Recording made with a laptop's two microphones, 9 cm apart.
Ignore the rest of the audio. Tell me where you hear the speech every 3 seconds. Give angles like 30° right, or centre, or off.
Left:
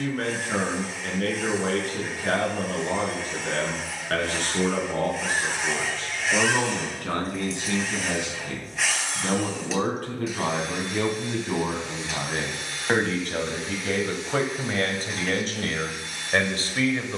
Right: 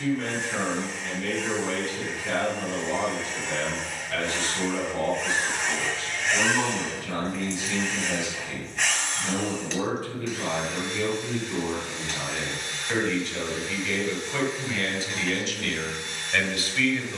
60° left, 60° left, 60° left, 60° left, 50° left, 40° left.